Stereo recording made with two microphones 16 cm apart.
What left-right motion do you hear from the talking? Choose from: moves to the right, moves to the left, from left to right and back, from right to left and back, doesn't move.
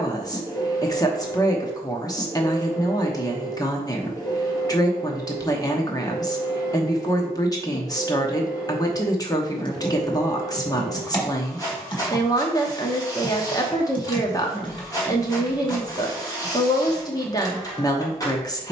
doesn't move.